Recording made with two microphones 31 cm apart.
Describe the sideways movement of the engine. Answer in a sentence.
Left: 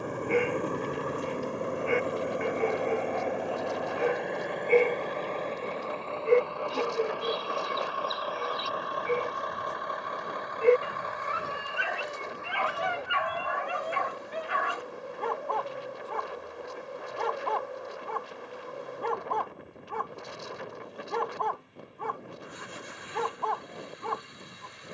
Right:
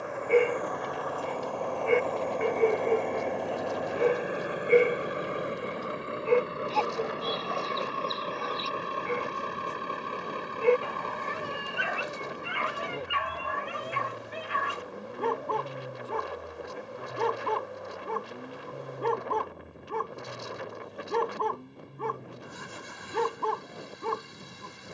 In this clip you hear the engine travel towards the right.